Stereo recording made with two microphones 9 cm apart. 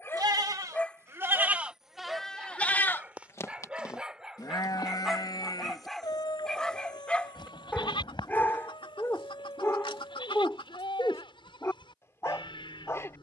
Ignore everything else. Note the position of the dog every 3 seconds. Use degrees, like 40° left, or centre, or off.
10° left, centre, 20° left, 30° left, 30° left.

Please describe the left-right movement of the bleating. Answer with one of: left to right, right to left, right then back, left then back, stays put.
right to left.